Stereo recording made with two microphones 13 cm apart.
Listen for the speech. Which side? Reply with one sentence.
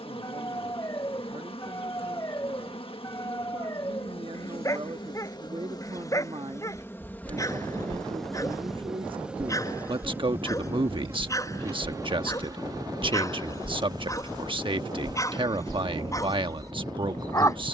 In this clip you hear the speech on the right.